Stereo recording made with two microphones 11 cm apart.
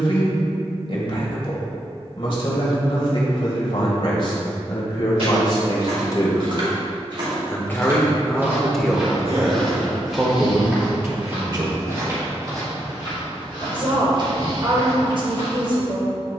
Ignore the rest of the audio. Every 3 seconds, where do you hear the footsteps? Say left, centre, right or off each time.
off, right, right, centre, right, right.